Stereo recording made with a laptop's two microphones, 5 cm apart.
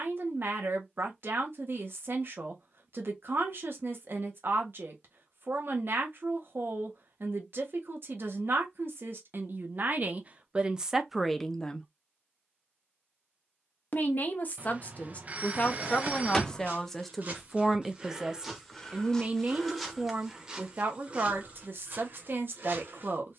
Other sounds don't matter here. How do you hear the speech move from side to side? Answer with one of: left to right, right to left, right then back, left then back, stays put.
left then back.